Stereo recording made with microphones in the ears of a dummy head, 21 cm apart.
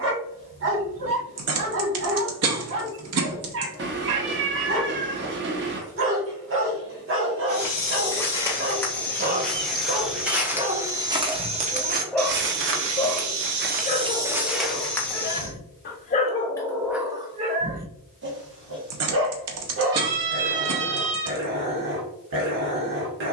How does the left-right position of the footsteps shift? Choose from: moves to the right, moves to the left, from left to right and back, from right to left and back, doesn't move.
from left to right and back.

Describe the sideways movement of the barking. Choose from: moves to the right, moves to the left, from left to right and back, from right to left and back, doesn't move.
from right to left and back.